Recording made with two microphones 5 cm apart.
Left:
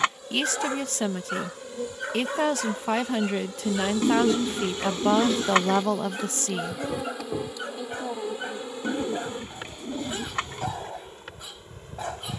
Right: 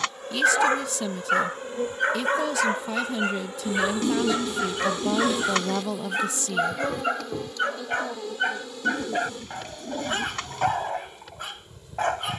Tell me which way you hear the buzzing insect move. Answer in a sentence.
You can hear the buzzing insect move from right to left.